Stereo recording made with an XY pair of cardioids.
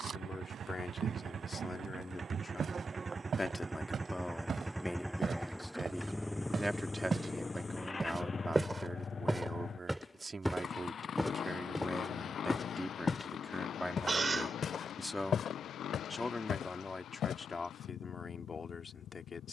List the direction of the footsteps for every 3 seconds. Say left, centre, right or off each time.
right, right, right, centre, left, left, off.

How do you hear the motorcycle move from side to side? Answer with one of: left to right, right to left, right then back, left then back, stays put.
right to left.